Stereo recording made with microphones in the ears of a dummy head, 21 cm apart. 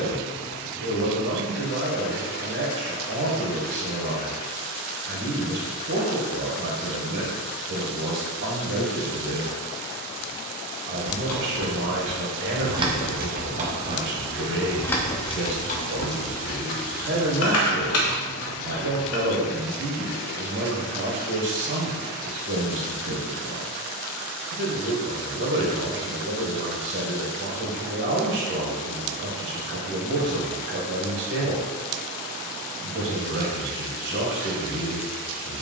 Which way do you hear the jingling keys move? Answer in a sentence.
In this clip you hear the jingling keys go right and come back.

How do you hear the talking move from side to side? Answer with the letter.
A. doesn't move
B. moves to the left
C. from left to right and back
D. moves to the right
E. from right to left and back
A.